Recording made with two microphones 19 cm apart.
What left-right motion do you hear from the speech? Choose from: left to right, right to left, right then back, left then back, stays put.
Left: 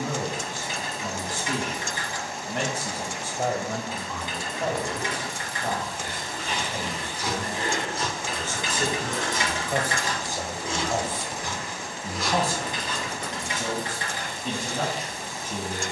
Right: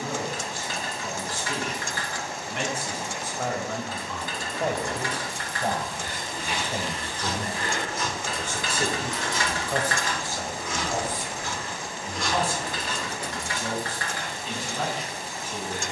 right then back.